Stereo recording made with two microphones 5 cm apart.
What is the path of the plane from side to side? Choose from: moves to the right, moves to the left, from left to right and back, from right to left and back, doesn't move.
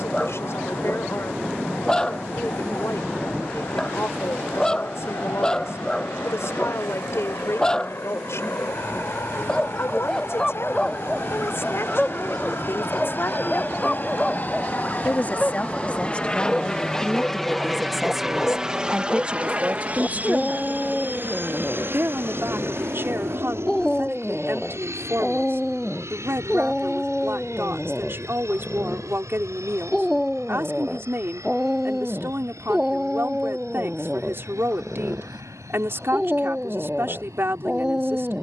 moves to the right.